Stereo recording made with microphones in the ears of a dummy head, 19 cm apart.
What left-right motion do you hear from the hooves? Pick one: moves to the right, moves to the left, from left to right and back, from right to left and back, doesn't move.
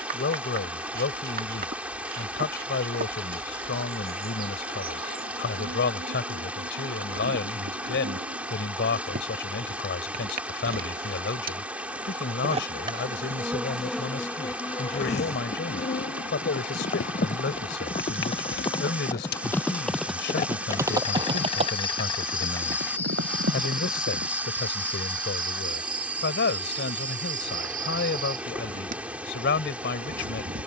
moves to the right.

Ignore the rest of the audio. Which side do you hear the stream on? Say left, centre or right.
centre.